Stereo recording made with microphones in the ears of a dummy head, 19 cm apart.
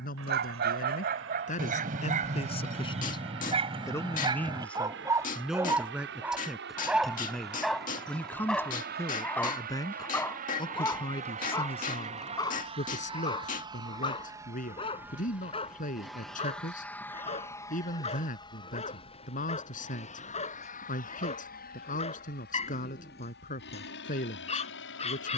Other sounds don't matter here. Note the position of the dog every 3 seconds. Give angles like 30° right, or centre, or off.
40° right, 20° right, centre, 10° left, 20° left, 30° left, 30° left, 30° left, 30° left.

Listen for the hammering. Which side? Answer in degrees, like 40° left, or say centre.
40° left.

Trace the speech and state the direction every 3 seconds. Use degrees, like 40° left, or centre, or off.
30° left, 10° left, centre, 20° left, 40° left, 40° left, 40° left, 40° left, 40° left.